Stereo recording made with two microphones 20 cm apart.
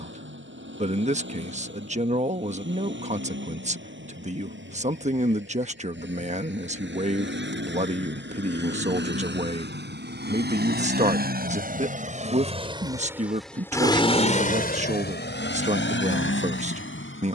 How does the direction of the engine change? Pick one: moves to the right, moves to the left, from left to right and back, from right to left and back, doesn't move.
moves to the left.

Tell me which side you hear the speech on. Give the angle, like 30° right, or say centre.
40° right.